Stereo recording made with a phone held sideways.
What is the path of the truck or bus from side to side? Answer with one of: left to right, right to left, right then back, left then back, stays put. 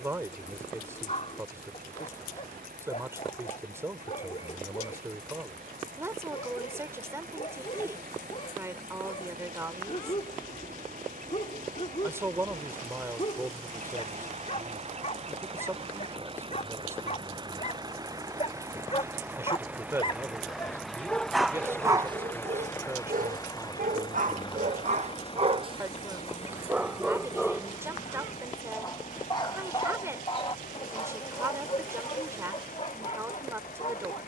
right to left.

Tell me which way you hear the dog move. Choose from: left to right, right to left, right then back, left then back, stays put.
right then back.